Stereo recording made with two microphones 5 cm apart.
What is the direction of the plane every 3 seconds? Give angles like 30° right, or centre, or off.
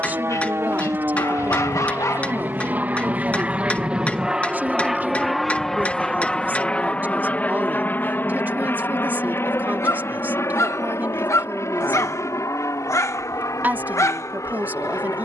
40° right, 10° right, 30° left, 50° left, 60° left.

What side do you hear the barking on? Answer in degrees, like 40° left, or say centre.
70° left.